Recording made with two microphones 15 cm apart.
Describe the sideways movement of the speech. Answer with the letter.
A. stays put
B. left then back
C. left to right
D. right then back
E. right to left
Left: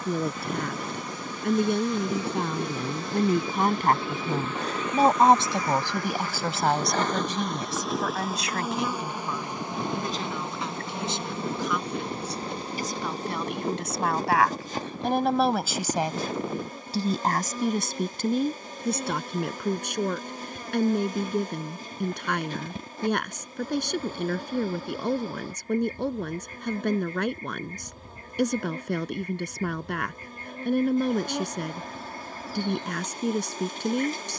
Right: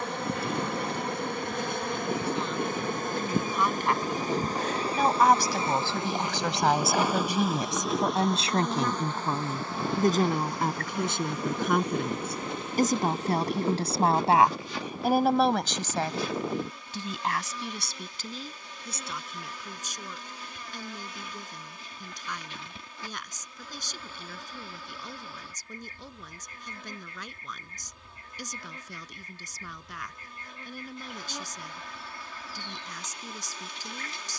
D.